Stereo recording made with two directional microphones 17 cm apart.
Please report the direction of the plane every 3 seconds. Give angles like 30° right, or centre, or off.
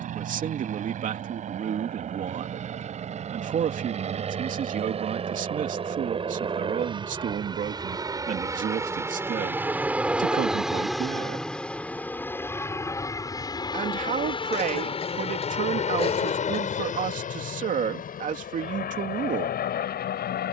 50° right, 40° right, 30° right, centre, 20° left, 40° left, 50° left.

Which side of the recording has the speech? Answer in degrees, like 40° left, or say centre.
50° right.